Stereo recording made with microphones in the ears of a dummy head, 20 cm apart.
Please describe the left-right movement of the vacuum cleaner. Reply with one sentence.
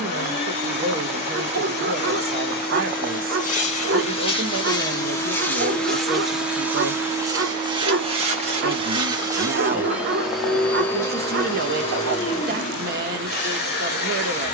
In this clip you hear the vacuum cleaner go right and come back.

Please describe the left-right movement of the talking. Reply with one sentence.
You can hear the talking stay put.